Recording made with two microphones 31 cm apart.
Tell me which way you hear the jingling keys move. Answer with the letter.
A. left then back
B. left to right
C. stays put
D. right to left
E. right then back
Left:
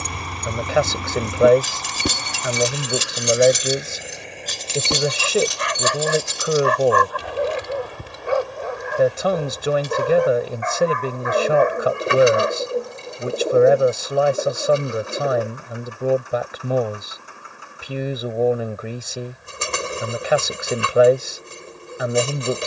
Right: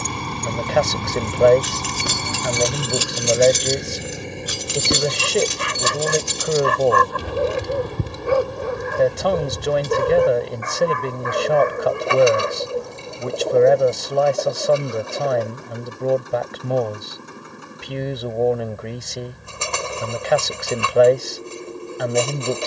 B.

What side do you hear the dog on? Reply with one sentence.
In this clip you hear the dog on the right.